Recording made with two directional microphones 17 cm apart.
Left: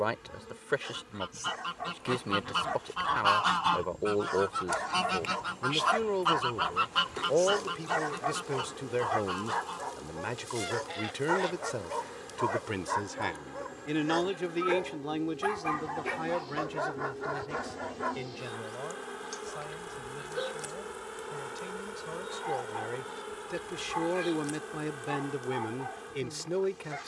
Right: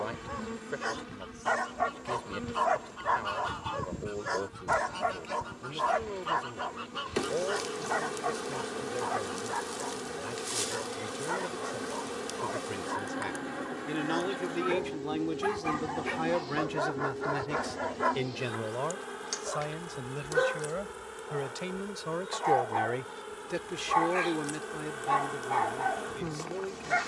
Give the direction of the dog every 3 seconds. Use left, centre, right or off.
right, right, centre, left, left, centre, right, right, right.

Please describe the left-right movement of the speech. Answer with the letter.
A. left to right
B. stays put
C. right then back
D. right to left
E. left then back
C.